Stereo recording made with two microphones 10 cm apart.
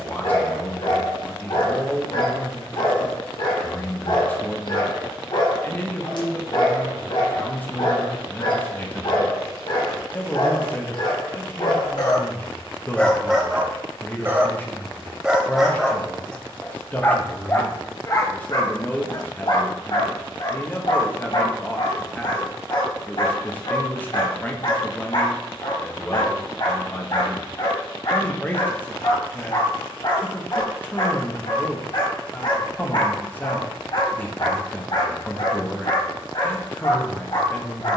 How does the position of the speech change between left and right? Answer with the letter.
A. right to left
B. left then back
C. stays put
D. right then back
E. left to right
C.